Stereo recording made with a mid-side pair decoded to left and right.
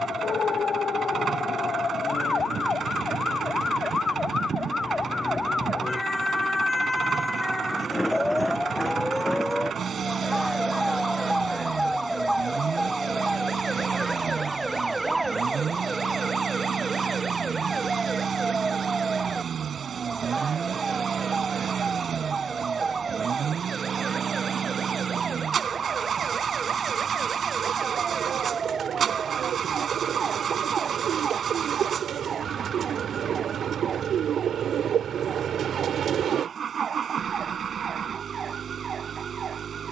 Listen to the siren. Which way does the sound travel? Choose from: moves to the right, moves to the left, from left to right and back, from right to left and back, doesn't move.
moves to the right.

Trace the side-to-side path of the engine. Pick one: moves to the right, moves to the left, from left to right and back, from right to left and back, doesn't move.
doesn't move.